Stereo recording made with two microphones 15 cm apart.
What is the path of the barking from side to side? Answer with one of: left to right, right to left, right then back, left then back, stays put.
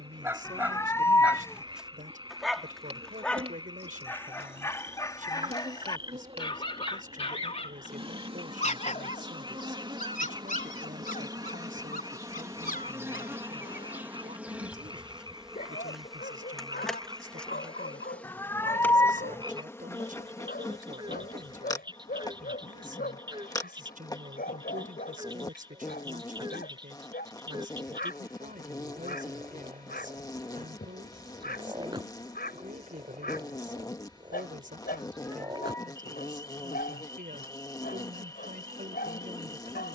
right to left.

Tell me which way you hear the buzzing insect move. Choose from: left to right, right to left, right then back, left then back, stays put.
right to left.